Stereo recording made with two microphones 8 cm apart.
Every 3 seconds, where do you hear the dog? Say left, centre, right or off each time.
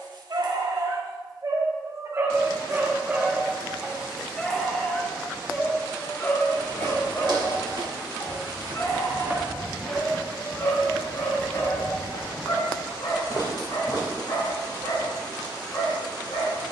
right, centre, left, left, left, left.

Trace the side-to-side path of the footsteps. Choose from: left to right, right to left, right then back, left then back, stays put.
right to left.